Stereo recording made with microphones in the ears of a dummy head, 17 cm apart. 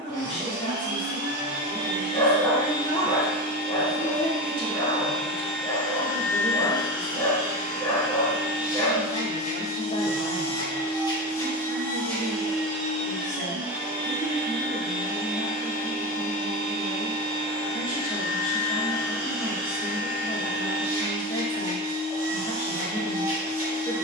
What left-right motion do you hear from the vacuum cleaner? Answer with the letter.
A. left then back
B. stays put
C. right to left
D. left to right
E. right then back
A.